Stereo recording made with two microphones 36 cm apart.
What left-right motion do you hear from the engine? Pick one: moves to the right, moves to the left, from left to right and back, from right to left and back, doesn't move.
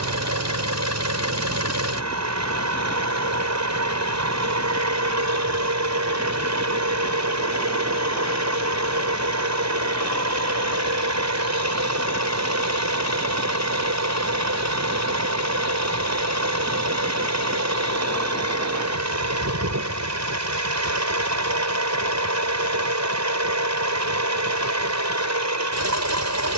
doesn't move.